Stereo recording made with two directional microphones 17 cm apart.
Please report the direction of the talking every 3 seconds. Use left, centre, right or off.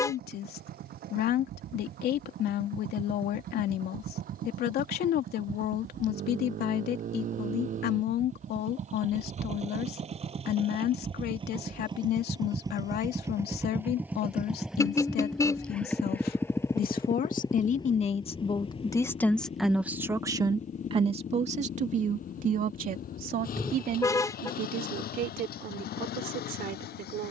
left, left, left, left, left, left, centre, right, right.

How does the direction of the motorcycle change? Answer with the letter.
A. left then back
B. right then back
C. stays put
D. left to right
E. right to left
E.